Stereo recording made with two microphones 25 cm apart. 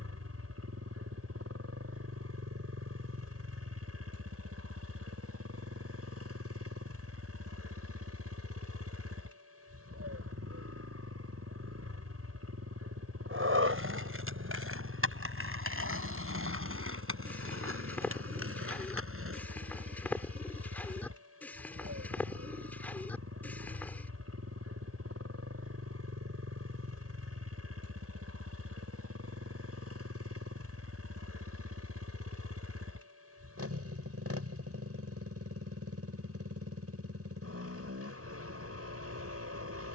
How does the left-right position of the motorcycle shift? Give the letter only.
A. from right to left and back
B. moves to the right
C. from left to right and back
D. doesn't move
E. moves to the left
D.